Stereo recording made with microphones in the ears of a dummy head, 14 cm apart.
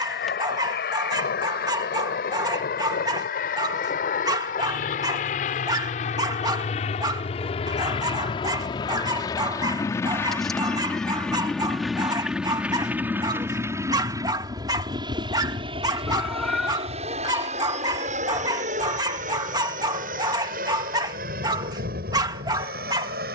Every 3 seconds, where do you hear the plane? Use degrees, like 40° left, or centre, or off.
60° left, 50° left, 40° left, 10° left, 10° right, 30° right, 50° right, 50° right.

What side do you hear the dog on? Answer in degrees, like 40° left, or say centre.
20° right.